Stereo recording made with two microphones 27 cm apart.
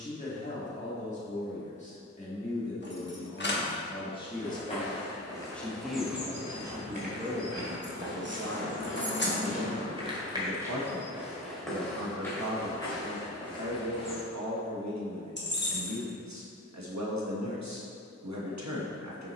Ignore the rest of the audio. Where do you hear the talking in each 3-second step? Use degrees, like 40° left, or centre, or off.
30° left, 10° left, 30° right, 70° right, 80° right, 80° right, 80° right.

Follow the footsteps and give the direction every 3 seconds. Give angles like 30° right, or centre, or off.
off, 20° left, 30° right, 10° right, 10° left, off, off.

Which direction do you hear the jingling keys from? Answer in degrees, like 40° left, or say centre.
40° left.